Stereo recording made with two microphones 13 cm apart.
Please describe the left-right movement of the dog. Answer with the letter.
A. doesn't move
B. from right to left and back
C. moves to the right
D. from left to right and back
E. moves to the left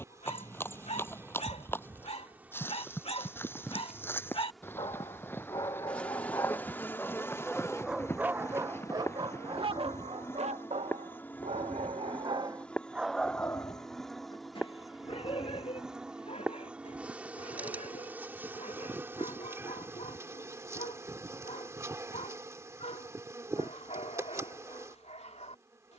D.